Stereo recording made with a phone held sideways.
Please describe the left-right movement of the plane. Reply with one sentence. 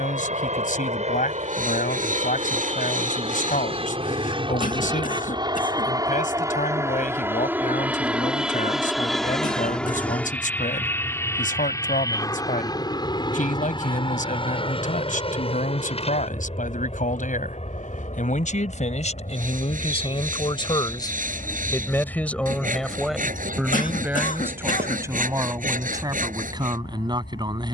In this clip you hear the plane move from right to left.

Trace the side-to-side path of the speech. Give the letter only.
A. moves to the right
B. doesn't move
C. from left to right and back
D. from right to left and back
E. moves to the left
A.